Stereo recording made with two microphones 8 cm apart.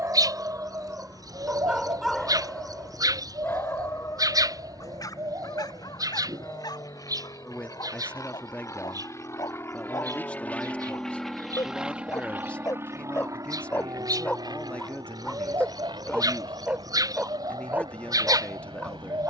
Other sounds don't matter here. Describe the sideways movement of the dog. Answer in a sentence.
In this clip you hear the dog move from right to left and back again.